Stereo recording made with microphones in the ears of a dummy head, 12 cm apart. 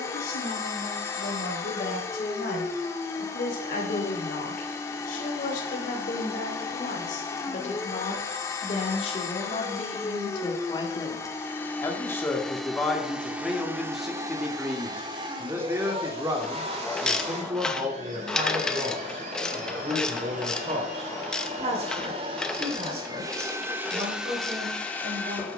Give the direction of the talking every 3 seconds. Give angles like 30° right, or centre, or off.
80° left, 70° left, 60° left, 40° left, centre, 30° right, 40° right, 50° right, 50° right.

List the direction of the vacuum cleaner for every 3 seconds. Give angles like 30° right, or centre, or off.
20° left, 20° left, 20° left, 20° left, 10° right, 40° right, 60° right, 30° right, centre.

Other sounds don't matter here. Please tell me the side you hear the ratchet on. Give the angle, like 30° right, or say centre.
10° left.